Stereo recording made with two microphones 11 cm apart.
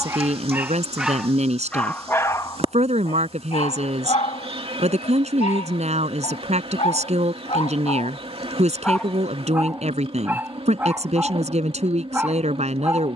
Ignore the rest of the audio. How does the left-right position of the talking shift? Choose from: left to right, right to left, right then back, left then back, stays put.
stays put.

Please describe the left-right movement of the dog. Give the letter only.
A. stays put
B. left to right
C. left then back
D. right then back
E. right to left
C.